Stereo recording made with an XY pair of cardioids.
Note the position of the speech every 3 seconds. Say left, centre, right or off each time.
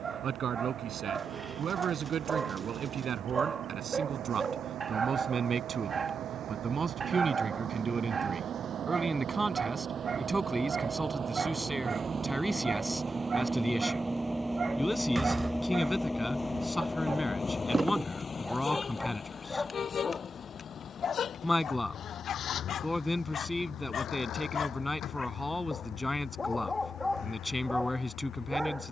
right, right, right, centre, centre, centre, centre, centre, centre, centre.